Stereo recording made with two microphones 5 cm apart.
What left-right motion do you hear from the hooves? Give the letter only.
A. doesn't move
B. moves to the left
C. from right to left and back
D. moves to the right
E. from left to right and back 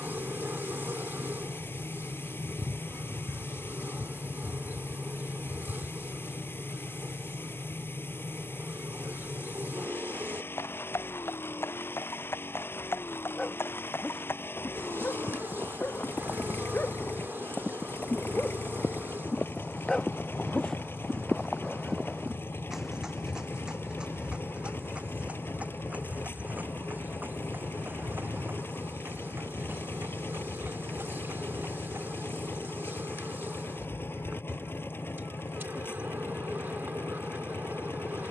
D.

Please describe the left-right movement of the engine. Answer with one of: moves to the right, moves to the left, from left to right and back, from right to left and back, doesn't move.
doesn't move.